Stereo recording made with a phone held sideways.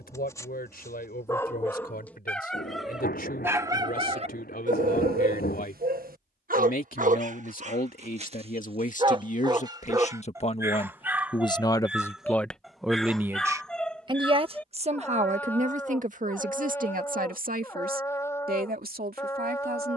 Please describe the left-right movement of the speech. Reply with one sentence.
In this clip you hear the speech travel towards the right.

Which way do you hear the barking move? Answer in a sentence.
In this clip you hear the barking go right and come back.